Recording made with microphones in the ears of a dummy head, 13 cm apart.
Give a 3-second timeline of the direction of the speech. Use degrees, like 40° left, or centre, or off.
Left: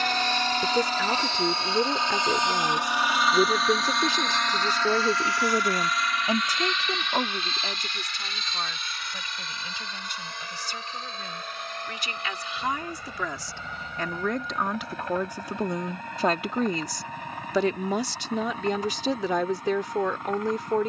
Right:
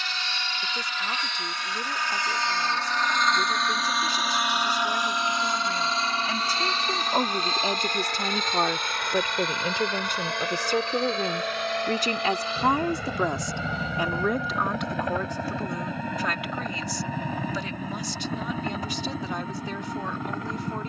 60° left, 50° left, 10° right, 40° right, 20° right, 30° left, 60° left.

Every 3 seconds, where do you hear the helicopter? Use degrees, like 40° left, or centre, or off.
30° left, 10° right, 30° right, 50° right, 60° right, 60° right, 70° right.